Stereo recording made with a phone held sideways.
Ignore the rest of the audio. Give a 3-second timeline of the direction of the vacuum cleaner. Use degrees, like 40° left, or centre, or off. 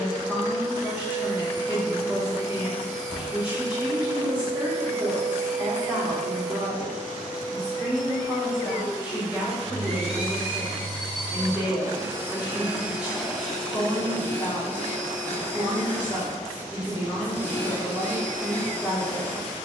30° left, 40° right, 60° right, 40° right, centre, 10° left, 10° left.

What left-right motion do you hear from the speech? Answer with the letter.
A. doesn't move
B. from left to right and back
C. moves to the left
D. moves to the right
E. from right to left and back
A.